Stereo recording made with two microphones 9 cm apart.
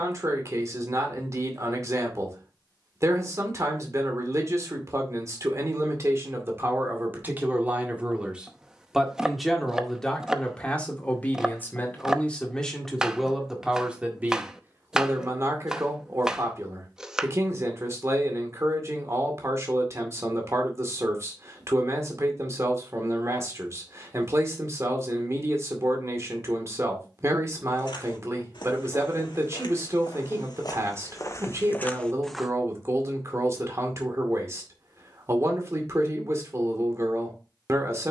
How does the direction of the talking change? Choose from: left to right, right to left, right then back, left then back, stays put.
left then back.